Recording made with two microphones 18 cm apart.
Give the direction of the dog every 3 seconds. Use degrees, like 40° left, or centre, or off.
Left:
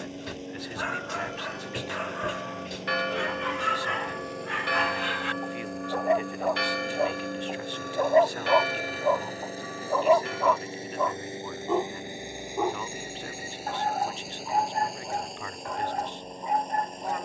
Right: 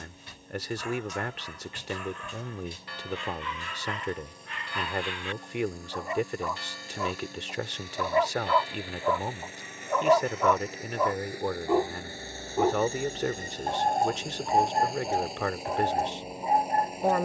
80° left, 70° left, 50° left, centre, 20° right, 30° right.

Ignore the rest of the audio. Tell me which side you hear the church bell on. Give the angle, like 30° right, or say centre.
70° left.